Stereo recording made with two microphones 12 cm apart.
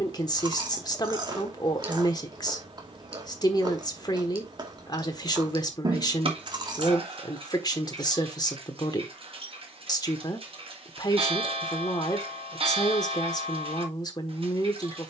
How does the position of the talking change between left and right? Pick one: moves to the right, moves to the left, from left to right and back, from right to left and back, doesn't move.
doesn't move.